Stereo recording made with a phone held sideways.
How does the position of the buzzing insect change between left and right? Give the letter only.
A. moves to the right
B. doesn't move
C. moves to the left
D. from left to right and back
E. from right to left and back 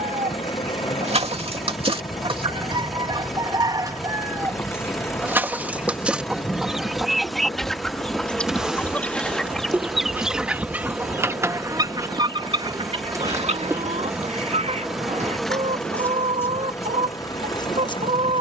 D.